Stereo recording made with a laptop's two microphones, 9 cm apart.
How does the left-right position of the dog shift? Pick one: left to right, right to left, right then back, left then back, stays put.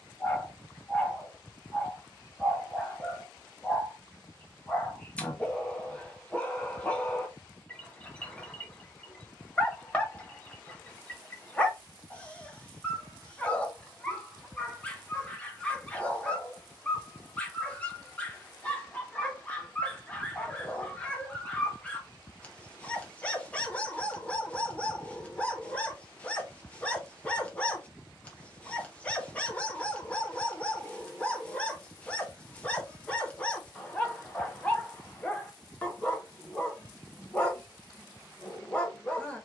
stays put.